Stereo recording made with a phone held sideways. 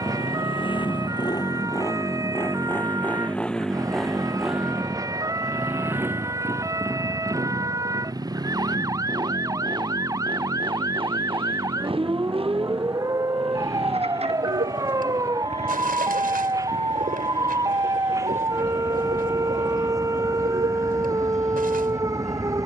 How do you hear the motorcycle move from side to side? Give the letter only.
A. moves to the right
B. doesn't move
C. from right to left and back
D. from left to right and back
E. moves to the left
A.